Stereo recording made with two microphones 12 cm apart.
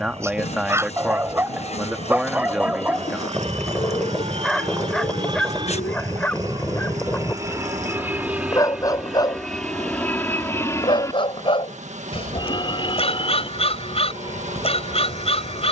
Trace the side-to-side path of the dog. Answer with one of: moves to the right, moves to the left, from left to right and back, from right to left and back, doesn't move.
moves to the left.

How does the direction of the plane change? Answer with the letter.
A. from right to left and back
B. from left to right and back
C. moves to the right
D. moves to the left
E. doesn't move
D.